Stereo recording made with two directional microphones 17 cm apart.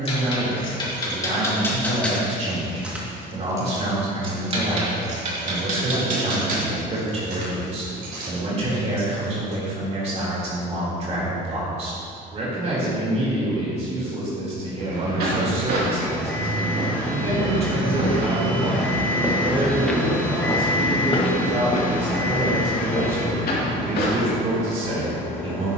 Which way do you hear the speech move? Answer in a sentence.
You can hear the speech stay put.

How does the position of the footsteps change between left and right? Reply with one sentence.
You can hear the footsteps move from right to left.